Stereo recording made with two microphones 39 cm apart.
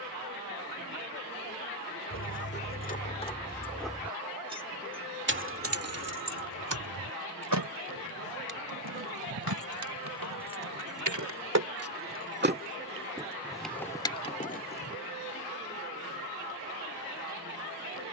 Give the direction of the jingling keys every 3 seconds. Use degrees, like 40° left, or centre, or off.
30° left, 10° right, 60° right, 60° right, centre, off.